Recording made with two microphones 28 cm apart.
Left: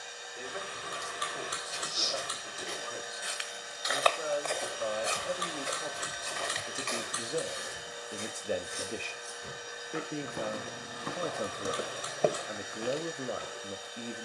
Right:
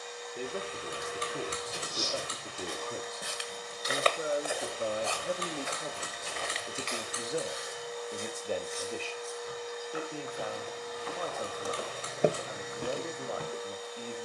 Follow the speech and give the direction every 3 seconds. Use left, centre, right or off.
right, right, centre, left, left.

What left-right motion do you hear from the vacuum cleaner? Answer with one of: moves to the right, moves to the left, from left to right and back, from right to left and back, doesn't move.
doesn't move.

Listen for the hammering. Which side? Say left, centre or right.
right.